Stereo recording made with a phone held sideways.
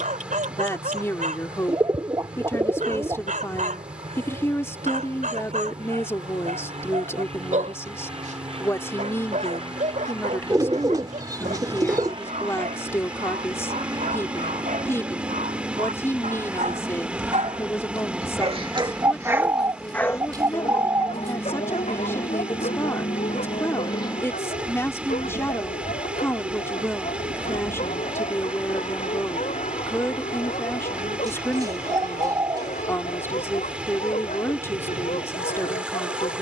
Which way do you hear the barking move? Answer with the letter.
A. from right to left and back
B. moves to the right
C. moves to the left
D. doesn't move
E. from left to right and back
C.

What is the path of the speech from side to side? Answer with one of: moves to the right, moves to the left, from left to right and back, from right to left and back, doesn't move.
doesn't move.